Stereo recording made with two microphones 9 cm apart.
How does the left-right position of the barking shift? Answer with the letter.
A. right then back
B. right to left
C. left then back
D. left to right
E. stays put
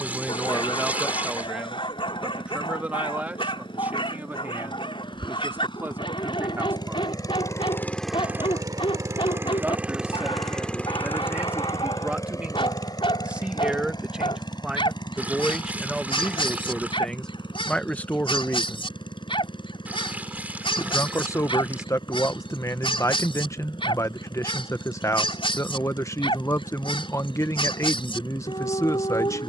E.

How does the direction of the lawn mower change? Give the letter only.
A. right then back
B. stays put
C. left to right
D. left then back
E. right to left
A.